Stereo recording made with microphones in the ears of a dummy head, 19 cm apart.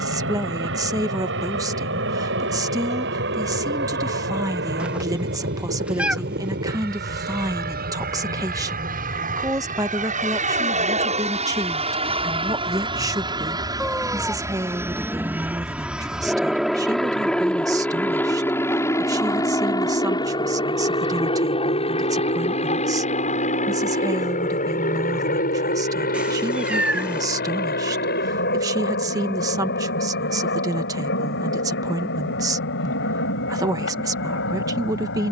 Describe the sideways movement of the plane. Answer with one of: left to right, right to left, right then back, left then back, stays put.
right to left.